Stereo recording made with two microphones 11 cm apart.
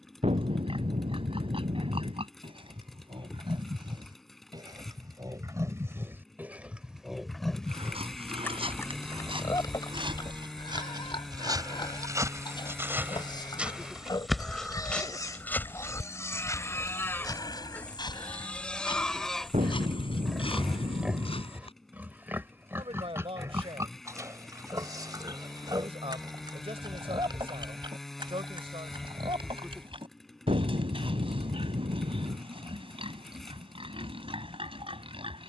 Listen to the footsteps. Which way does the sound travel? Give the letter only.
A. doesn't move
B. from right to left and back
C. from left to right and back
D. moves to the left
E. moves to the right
D.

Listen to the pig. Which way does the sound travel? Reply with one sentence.
In this clip you hear the pig move from right to left and back again.